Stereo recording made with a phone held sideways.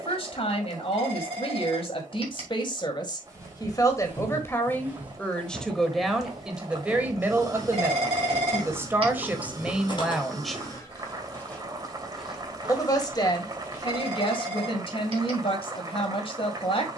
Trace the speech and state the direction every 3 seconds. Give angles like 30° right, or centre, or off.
40° left, 20° left, 10° right, 10° right, 30° left, 40° left.